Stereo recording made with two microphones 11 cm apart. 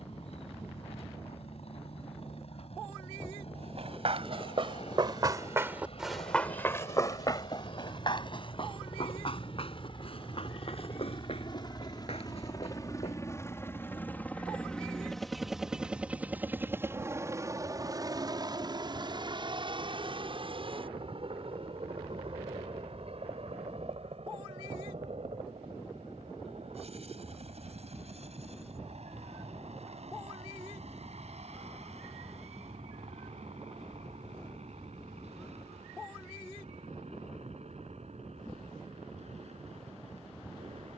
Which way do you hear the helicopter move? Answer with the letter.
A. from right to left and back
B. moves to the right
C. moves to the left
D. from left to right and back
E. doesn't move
B.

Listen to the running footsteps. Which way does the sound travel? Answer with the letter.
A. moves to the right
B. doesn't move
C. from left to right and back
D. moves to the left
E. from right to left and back
D.